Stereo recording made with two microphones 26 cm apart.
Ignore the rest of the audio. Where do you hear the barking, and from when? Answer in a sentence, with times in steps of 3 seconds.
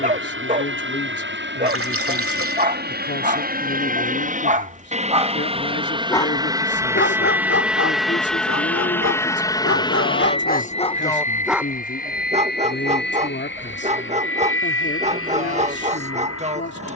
You can hear the barking on the right from 0 s, on the left from 6 s and on the right from 12 s.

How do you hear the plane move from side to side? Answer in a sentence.
You can hear the plane move to the left.